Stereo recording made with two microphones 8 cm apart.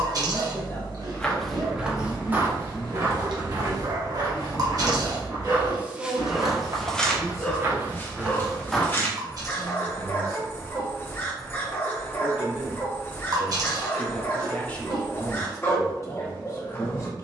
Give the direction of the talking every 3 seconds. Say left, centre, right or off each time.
left, centre, right, right, centre, left.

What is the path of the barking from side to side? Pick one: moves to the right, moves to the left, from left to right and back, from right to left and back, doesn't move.
moves to the left.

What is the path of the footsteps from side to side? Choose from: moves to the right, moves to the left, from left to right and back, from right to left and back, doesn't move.
from left to right and back.